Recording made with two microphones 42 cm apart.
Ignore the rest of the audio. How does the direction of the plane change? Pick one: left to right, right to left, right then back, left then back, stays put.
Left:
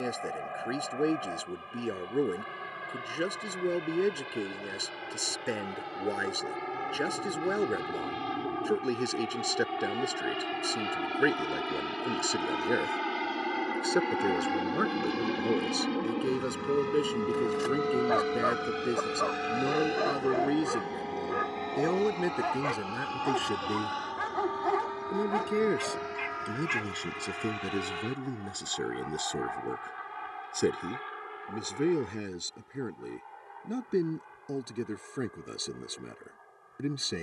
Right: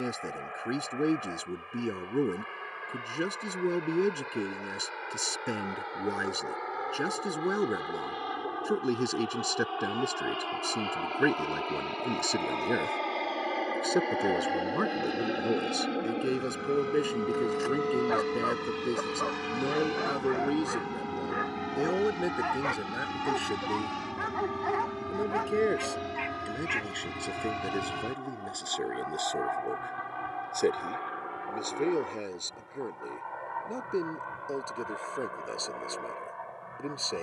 left to right.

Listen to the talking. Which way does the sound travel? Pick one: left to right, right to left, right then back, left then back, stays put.
right to left.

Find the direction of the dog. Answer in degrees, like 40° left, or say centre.
50° left.